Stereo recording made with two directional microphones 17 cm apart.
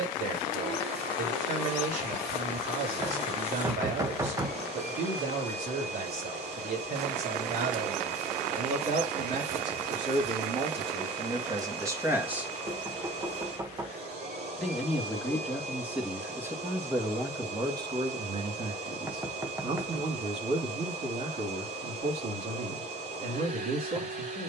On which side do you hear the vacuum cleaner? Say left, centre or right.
right.